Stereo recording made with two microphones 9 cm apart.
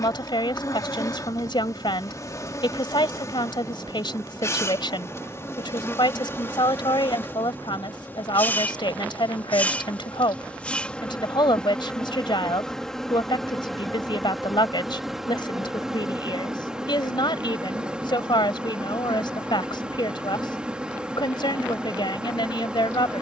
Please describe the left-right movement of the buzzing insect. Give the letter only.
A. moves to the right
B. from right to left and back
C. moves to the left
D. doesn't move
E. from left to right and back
A.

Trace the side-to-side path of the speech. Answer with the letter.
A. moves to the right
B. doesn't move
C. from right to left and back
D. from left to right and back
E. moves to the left
B.